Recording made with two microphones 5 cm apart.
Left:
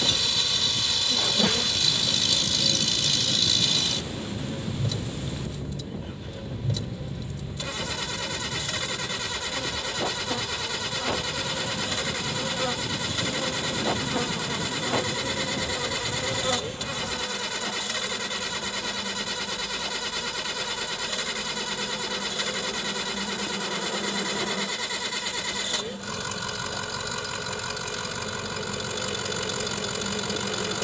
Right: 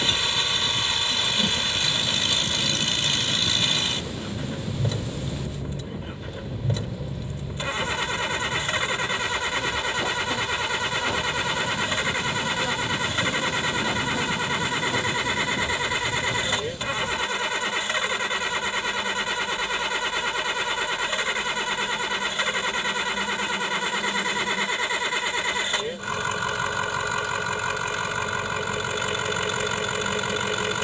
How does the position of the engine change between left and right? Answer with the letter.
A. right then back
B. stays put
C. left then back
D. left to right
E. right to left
B.